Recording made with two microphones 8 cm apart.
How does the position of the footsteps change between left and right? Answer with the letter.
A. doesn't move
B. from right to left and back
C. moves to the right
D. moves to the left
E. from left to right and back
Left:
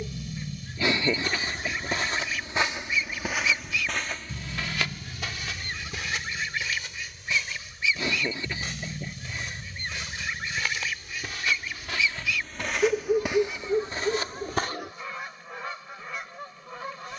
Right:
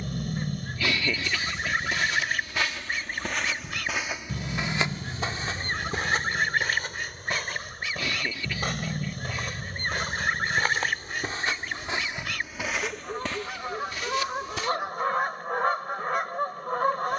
E.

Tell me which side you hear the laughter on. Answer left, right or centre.
left.